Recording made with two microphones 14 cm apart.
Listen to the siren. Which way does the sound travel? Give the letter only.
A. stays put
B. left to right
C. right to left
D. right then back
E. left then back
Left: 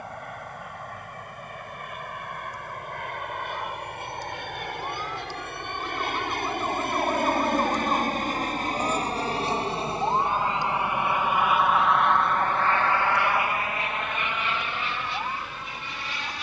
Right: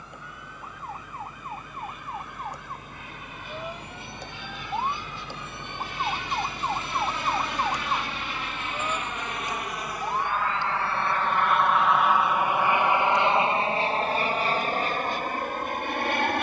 C.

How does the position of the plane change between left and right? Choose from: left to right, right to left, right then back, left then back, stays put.
left to right.